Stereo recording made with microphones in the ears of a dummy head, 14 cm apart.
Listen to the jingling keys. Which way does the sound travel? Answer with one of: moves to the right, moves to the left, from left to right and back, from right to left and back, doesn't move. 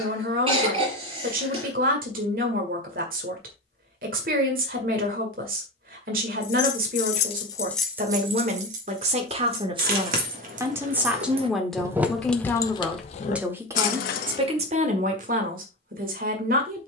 from left to right and back.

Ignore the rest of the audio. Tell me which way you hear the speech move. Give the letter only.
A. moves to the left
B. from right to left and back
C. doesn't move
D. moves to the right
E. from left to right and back
B.